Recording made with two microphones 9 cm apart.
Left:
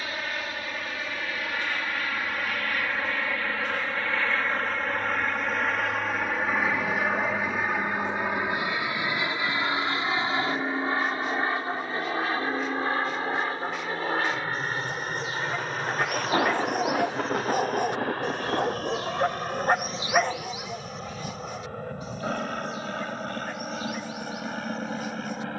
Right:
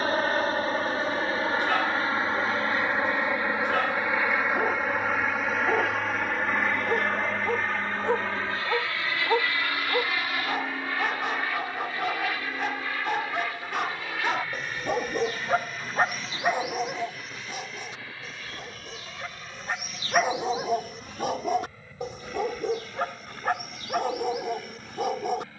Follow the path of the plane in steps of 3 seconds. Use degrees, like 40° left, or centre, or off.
30° right, 10° right, 10° left, 20° left, 30° left, 40° left, 50° left, 50° left, 50° left.